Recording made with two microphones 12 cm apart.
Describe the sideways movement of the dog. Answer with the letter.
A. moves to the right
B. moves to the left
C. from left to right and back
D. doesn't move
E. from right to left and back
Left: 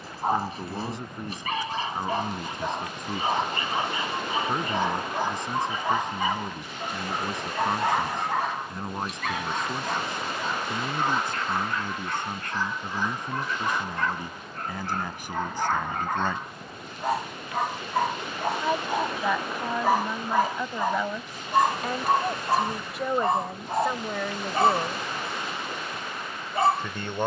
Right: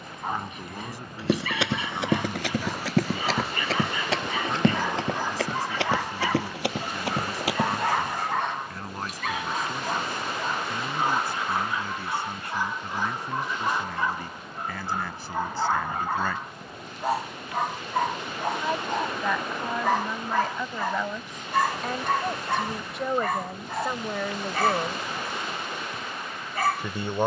C.